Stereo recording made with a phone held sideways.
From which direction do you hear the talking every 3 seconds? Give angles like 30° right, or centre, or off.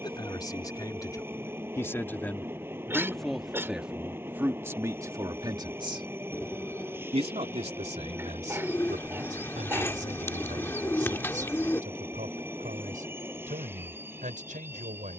20° left, 20° right, 60° right, 70° right, 80° right.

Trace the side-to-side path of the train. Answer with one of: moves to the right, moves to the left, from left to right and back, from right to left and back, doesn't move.
doesn't move.